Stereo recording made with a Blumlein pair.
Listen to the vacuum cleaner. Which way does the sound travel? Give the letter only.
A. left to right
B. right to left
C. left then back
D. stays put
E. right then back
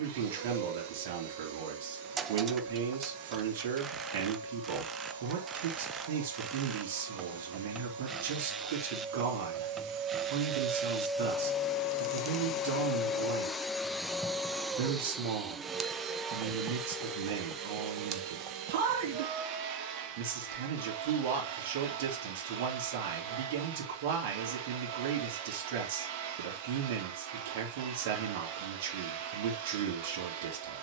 C.